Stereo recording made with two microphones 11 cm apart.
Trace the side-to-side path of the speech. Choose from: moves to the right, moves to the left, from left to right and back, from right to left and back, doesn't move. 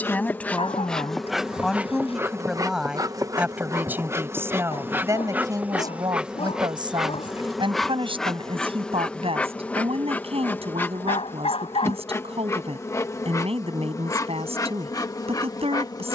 moves to the right.